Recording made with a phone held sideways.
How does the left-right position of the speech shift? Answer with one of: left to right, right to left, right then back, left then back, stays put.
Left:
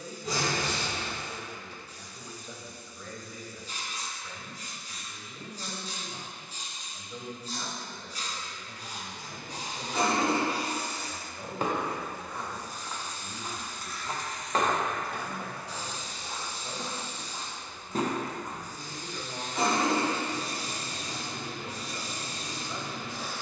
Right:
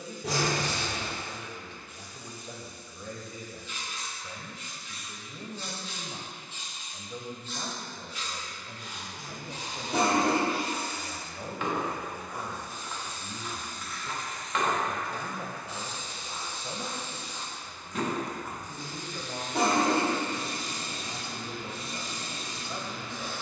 stays put.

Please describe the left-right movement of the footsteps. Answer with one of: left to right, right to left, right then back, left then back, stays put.
left then back.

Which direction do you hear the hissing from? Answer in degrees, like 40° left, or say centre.
40° left.